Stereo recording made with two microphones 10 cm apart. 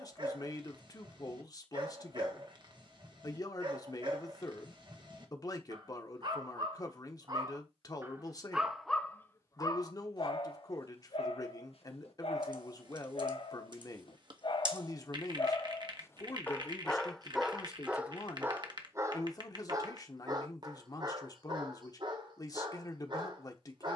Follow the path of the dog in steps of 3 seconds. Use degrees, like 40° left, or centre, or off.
50° right, 50° right, 30° right, 50° left, 60° left, 10° left, 30° right, 50° right.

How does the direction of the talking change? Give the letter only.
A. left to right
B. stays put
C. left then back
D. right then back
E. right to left
B.